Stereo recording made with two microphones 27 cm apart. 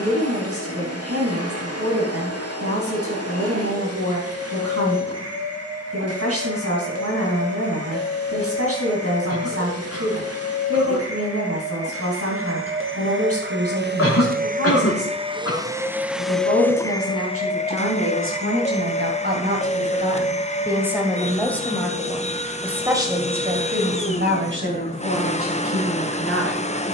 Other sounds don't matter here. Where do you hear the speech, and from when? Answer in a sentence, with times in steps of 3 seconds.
You can hear the speech on the right from 0 s, in the centre from 21 s and on the right from 24 s.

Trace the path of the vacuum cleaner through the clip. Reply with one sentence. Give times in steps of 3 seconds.
You can hear the vacuum cleaner on the right from 0 s, in the centre from 15 s and on the left from 18 s.